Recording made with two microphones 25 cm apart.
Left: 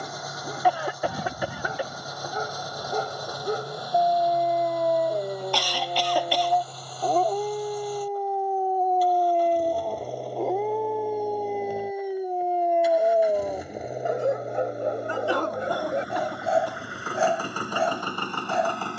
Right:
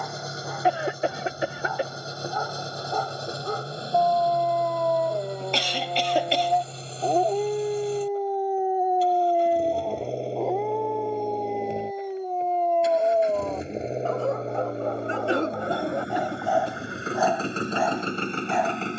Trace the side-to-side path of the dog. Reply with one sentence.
In this clip you hear the dog move from left to right and back again.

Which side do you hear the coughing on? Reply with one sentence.
In this clip you hear the coughing on the right.